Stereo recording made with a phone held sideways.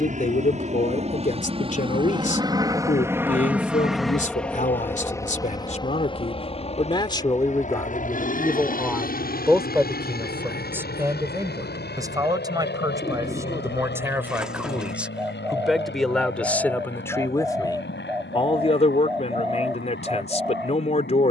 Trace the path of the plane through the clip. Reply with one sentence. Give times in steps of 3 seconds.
In this clip you hear the plane on the right from 0 s, in the centre from 3 s and on the left from 6 s.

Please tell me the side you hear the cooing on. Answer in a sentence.
You can hear the cooing in the centre.